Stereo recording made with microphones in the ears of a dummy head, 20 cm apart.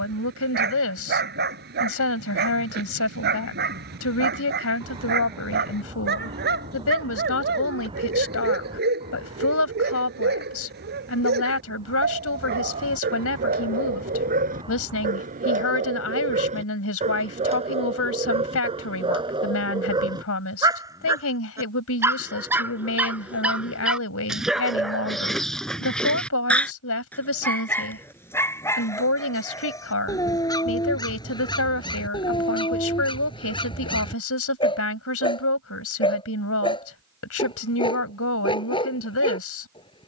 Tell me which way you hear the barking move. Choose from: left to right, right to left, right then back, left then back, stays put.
right to left.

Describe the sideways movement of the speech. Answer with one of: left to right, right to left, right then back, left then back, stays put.
stays put.